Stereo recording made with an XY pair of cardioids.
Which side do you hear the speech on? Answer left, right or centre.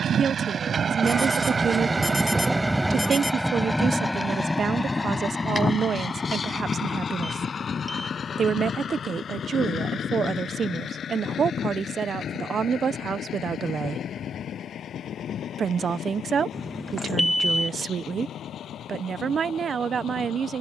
right.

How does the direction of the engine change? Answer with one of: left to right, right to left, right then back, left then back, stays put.
right to left.